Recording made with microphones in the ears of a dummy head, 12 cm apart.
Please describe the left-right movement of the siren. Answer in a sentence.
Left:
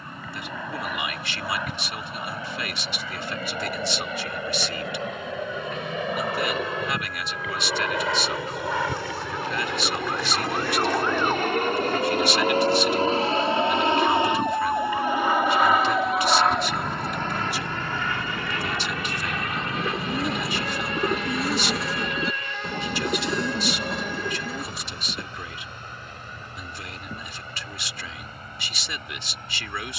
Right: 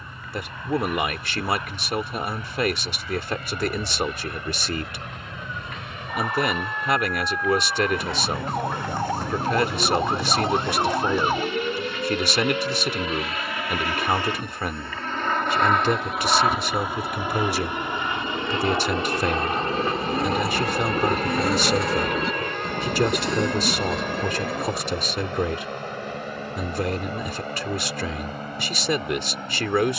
You can hear the siren move to the left.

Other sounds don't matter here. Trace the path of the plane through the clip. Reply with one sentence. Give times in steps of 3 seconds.
You can hear the plane on the left from 0 s, in the centre from 15 s and on the right from 18 s.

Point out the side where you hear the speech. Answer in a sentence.
In this clip you hear the speech on the right.